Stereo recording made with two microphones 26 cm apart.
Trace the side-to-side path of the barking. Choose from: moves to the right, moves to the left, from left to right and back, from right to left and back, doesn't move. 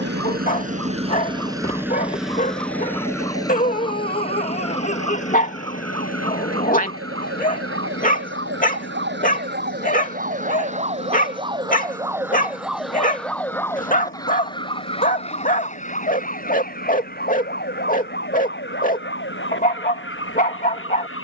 doesn't move.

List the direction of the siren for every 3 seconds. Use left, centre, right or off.
right, right, right, right, centre, left, left.